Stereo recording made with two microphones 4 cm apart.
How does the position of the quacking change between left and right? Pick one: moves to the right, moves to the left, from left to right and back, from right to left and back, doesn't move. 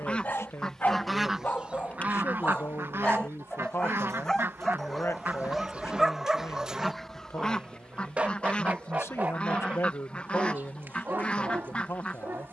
from left to right and back.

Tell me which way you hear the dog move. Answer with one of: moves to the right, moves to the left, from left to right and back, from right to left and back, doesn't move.
moves to the right.